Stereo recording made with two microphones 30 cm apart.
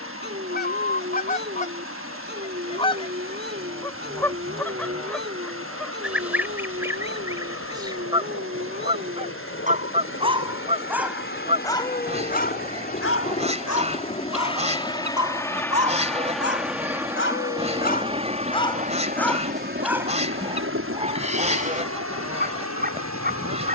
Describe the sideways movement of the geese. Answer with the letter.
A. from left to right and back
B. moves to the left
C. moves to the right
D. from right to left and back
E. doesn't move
C.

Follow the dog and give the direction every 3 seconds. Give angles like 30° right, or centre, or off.
30° right, 30° right, 30° right, 10° right, 50° left, 50° left, centre, 30° right.